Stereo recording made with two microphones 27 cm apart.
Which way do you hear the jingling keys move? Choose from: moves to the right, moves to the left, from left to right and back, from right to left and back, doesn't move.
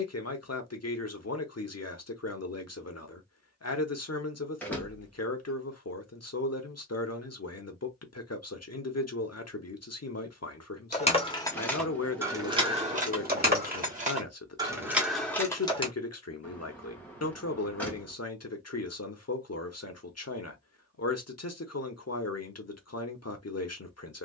from left to right and back.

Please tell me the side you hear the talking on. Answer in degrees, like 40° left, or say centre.
70° left.